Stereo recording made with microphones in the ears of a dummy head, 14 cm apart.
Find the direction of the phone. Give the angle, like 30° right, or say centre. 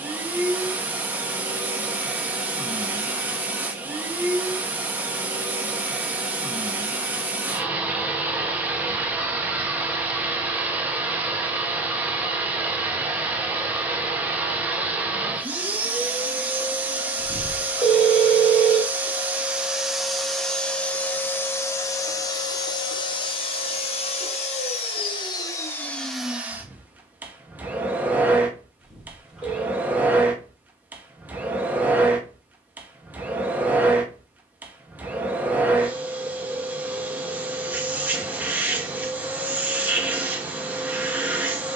10° right.